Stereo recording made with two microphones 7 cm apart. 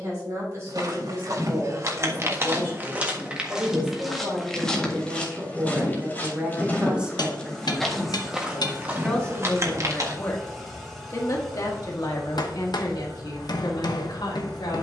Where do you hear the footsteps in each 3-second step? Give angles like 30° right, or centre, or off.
40° right, 10° left, 10° left, 40° right, off.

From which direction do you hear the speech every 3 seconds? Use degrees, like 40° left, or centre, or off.
40° right, 30° right, 10° right, 30° left, 80° left.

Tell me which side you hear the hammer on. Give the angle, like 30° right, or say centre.
70° left.